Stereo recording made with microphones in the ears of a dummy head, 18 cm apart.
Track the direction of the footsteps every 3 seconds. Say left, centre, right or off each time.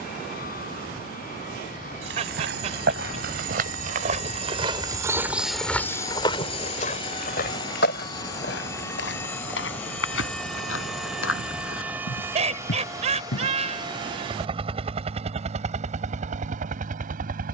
right, right, left, left, left, off.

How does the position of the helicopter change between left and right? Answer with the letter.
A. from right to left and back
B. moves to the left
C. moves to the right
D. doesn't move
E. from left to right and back
C.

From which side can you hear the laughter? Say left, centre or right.
right.